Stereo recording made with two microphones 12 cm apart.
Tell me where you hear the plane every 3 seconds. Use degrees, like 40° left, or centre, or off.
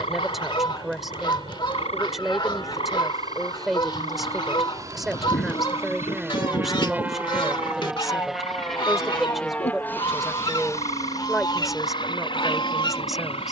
50° right, 30° right, 10° right, 20° left, 40° left.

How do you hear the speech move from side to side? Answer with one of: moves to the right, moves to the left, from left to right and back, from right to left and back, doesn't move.
doesn't move.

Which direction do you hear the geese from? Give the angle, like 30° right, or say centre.
40° left.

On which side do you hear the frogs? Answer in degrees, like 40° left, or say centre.
60° left.